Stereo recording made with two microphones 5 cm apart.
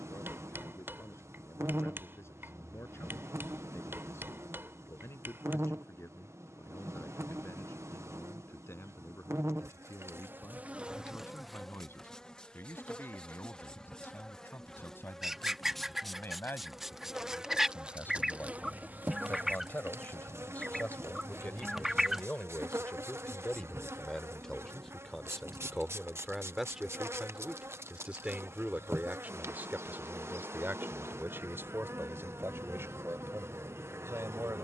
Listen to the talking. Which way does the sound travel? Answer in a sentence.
You can hear the talking travel towards the right.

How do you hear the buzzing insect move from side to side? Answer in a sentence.
You can hear the buzzing insect go left and come back.